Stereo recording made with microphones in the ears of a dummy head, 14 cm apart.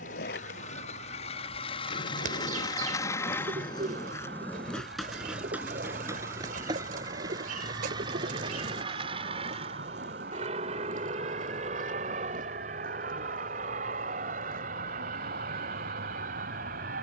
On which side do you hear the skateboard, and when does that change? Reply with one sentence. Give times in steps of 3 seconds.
You can hear the skateboard on the left from 0 s, in the centre from 3 s, on the right from 6 s and not at all from 15 s.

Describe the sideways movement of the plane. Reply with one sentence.
In this clip you hear the plane travel towards the right.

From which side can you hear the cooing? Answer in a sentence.
You can hear the cooing on the right.